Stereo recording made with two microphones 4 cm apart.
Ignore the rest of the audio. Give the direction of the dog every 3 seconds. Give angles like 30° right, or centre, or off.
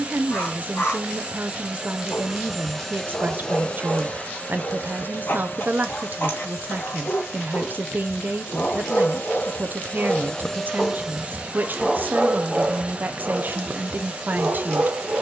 60° left, 60° left, 50° left, 20° left, 30° right.